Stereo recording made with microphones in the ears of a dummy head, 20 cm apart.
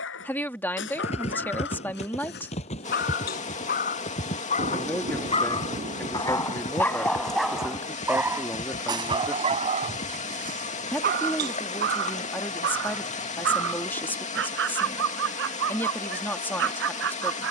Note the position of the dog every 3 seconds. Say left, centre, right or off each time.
left, left, centre, right, right, right.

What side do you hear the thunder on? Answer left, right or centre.
right.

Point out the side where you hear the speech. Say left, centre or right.
centre.